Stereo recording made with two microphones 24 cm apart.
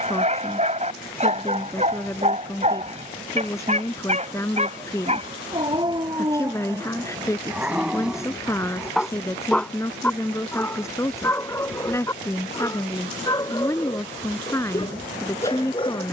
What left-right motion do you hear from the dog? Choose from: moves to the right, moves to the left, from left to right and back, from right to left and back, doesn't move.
moves to the left.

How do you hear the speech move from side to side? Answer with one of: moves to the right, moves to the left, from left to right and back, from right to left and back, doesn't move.
doesn't move.